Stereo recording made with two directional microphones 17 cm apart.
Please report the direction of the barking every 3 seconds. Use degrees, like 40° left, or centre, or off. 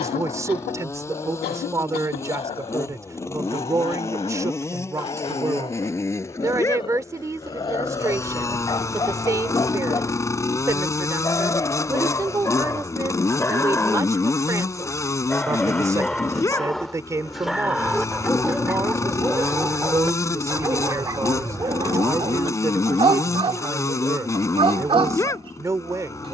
30° left, 30° left, 30° left, 20° left, 10° left, centre, 10° right, 30° right, 30° right.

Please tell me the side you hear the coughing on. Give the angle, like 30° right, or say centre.
70° left.